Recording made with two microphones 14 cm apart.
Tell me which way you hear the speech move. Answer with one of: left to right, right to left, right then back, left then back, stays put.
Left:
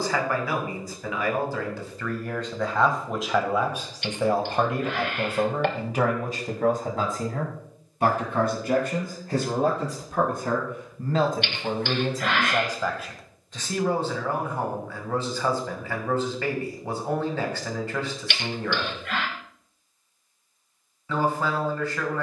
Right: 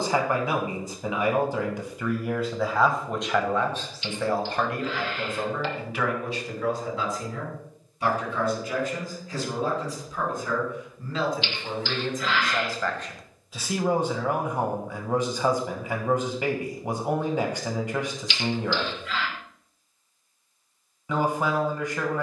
left then back.